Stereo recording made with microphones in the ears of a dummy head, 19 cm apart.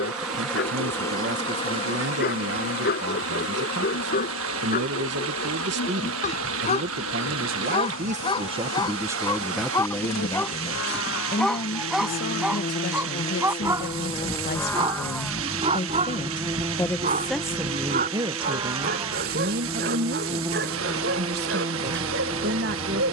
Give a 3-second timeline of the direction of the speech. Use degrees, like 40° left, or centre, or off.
50° right, 50° right, 40° right, 10° left, 50° left, 20° left, 40° right, 50° right.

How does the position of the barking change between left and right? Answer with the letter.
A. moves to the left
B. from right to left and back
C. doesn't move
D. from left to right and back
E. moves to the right
E.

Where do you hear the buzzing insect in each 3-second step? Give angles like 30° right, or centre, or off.
20° left, 60° left, 80° left, 70° left, 30° left, 10° right, 10° right, 10° right.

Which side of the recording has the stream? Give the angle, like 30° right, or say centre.
70° right.